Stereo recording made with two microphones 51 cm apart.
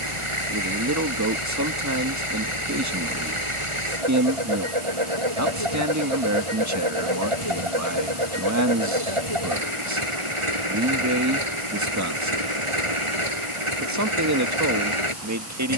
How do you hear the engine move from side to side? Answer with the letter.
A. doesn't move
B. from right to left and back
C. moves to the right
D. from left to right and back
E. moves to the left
A.